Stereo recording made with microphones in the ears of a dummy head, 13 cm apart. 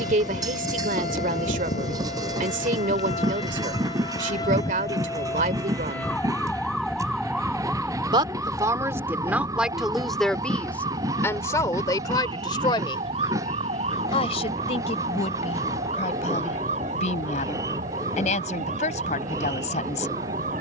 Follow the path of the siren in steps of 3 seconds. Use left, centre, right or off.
left, left, centre, right, right, right, right.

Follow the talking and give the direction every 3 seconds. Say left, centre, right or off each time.
right, right, right, centre, left, left, left.